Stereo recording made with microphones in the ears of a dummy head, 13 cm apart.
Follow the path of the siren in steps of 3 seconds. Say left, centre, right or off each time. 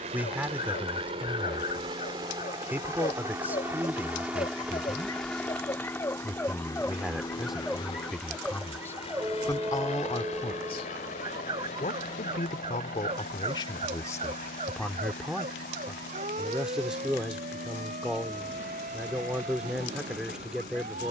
left, left, centre, right, right, right, right.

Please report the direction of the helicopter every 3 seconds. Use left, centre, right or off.
right, centre, left, left, left, left, left.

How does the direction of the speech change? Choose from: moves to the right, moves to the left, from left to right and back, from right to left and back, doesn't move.
from right to left and back.